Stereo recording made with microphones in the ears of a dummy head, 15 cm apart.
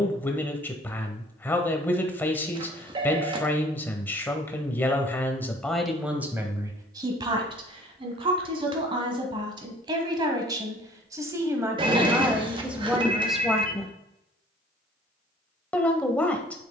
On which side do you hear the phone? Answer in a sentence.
You can hear the phone on the right.